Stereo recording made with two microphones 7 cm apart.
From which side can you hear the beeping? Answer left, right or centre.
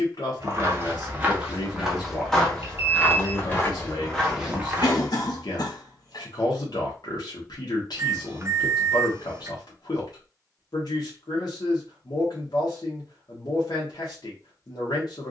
right.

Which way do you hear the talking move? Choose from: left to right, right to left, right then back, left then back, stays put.
stays put.